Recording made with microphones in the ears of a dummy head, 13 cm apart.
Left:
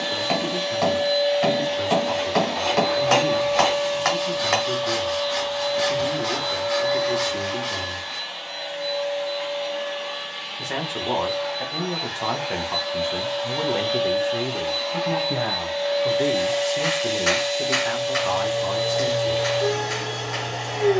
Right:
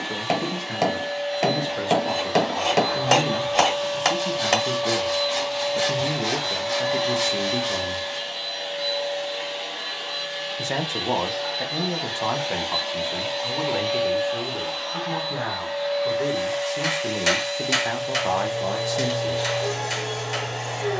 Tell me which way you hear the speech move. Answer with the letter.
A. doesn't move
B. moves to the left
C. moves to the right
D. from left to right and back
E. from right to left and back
E.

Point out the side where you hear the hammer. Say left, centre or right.
right.